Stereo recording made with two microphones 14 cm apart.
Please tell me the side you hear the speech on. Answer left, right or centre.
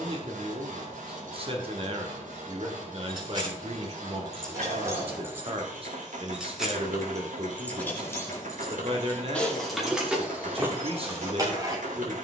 right.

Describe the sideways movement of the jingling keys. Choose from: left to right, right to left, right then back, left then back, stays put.
left then back.